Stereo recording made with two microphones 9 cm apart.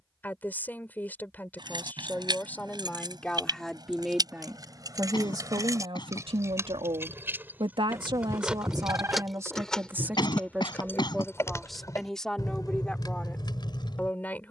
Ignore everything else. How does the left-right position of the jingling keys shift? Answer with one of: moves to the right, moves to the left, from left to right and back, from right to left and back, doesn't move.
moves to the left.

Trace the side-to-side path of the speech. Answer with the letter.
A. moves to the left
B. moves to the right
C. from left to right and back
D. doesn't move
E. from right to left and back
C.